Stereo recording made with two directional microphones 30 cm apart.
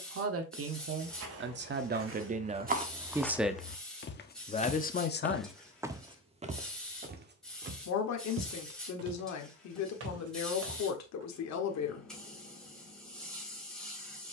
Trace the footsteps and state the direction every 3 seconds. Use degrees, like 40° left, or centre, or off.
40° right, 10° left, 30° right, 50° right, off.